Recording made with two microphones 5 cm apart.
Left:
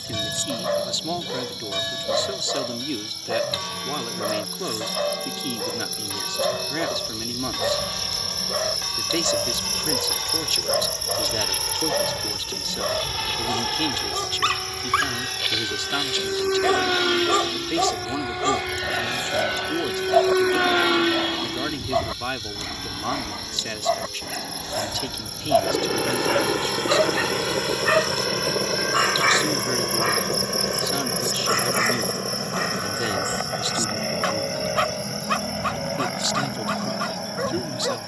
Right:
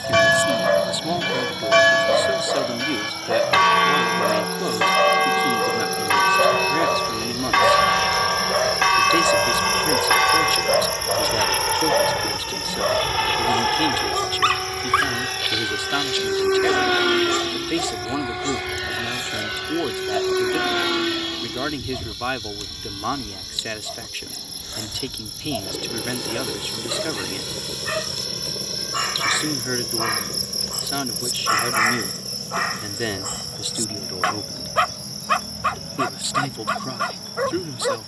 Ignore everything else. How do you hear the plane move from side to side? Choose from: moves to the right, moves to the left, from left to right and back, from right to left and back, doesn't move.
moves to the left.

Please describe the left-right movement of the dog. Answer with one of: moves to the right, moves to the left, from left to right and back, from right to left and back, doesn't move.
from right to left and back.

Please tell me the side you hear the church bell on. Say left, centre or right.
right.